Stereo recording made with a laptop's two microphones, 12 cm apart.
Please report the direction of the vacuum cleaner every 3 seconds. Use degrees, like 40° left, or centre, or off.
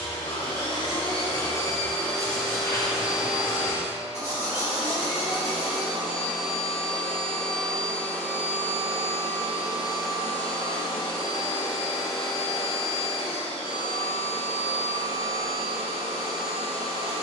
30° left, 20° right, centre, 40° left, 50° left, 50° left.